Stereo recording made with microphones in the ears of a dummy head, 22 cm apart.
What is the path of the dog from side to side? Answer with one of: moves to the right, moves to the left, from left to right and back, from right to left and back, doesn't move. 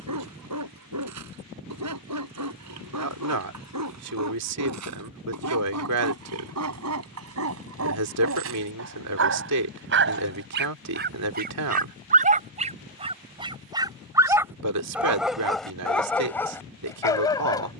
moves to the left.